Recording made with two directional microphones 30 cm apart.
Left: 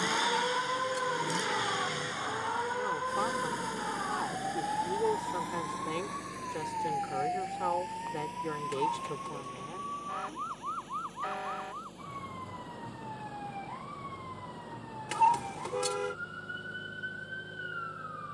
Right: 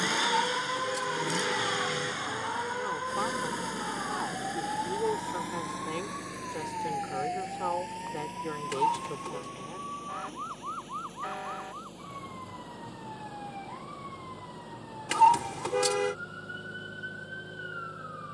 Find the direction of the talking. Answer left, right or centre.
centre.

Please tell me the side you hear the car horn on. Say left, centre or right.
right.